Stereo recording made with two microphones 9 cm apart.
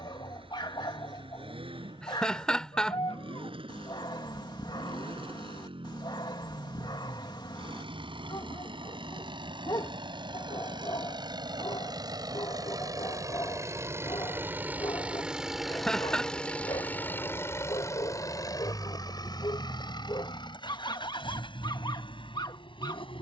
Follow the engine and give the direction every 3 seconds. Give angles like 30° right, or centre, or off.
70° right, 70° right, 70° right, 60° right, 30° right, 10° left, 50° left, 60° left.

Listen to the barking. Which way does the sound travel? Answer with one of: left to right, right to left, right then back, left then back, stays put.
stays put.